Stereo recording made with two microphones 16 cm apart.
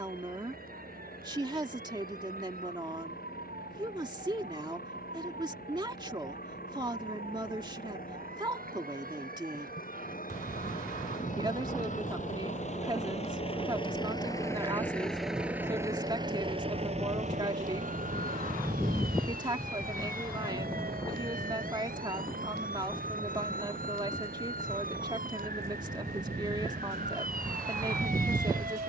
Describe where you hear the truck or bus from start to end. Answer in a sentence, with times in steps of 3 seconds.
You can hear the truck or bus on the left from 0 s and on the right from 15 s.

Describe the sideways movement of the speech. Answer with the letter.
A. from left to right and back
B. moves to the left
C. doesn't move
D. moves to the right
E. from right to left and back
C.